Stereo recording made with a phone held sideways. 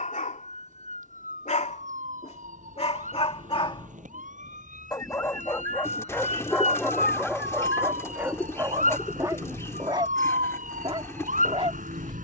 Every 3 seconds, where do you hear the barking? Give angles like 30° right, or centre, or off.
50° left, 30° left, 10° right, 30° right.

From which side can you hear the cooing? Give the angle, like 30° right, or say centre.
20° left.